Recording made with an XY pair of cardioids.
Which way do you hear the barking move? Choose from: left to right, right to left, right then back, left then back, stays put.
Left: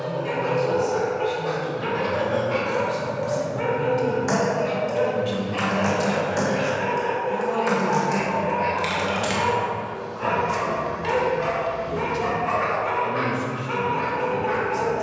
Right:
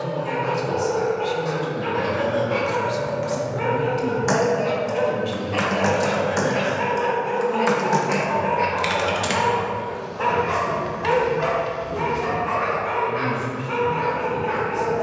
right then back.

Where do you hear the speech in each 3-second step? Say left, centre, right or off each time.
right, centre, left, left, left.